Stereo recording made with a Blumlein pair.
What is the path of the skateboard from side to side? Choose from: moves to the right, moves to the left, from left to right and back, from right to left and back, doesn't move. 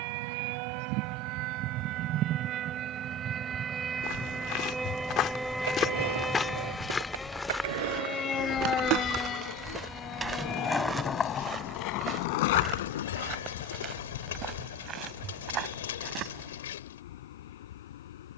moves to the left.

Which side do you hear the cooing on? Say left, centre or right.
left.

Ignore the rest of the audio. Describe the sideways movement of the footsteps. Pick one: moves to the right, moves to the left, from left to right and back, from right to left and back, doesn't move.
moves to the right.